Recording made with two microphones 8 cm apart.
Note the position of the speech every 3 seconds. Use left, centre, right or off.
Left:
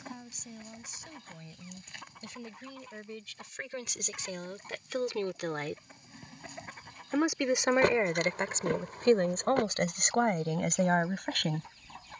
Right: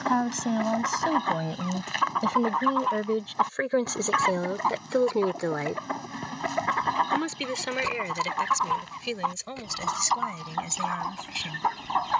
right, right, left, left.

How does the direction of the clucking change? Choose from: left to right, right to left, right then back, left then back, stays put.
stays put.